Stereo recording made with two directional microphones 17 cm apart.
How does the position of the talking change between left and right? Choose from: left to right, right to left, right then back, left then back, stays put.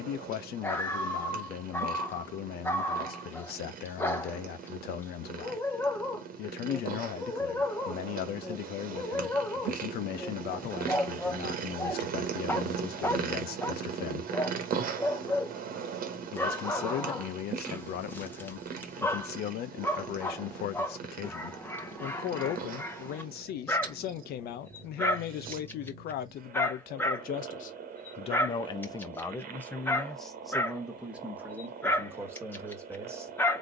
left to right.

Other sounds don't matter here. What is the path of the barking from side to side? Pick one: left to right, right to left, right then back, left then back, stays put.
stays put.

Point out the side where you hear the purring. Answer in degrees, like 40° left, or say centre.
60° right.